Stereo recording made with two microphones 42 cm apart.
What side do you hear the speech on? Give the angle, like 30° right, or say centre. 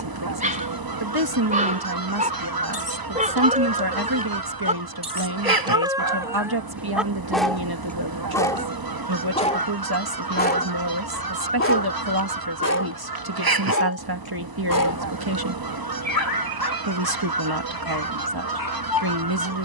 60° right.